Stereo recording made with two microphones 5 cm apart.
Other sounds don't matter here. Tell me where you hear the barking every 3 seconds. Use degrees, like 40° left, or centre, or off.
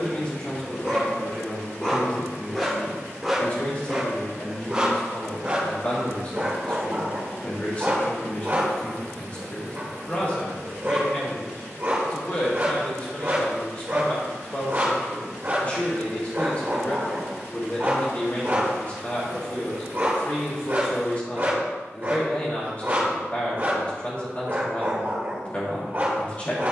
20° left, 20° right, 40° right, 40° right, 40° right, 40° right, 40° right, 40° right, 40° right.